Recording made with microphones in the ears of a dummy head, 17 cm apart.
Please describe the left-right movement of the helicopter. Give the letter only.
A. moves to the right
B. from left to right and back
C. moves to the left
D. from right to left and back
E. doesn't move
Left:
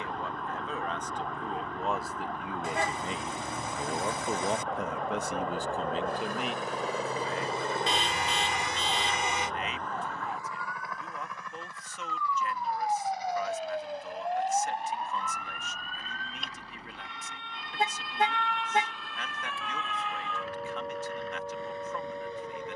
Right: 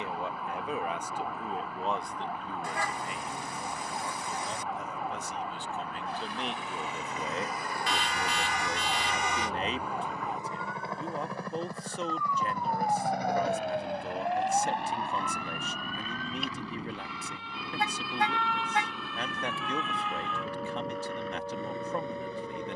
A.